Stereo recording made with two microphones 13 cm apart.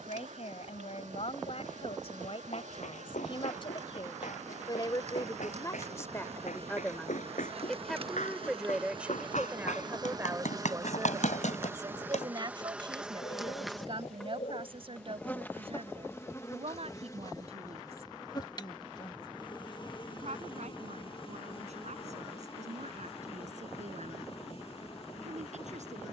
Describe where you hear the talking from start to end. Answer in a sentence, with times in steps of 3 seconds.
You can hear the talking on the left from 0 s, in the centre from 6 s and on the right from 9 s.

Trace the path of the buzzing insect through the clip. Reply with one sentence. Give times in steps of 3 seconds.
You can hear the buzzing insect on the right from 0 s, in the centre from 12 s and on the left from 15 s.